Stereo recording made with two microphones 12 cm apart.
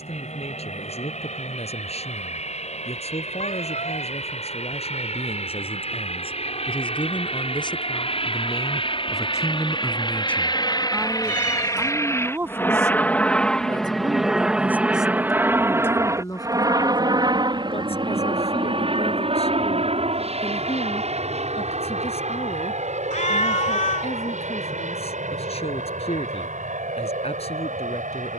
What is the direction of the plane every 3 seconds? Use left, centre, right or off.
left, left, left, left, centre, right, right, right, right, right.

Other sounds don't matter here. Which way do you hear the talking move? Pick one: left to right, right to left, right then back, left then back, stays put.
right then back.